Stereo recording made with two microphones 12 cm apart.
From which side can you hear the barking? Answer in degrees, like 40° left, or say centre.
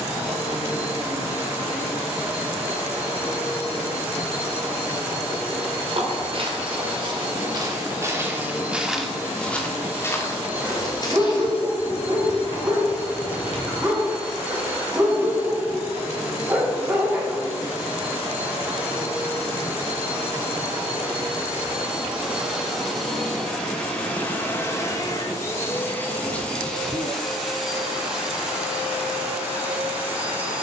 20° right.